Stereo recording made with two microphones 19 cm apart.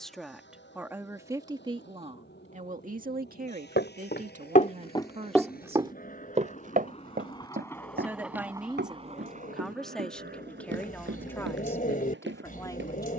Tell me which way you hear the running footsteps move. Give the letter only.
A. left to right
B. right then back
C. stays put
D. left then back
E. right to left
A.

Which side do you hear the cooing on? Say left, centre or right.
left.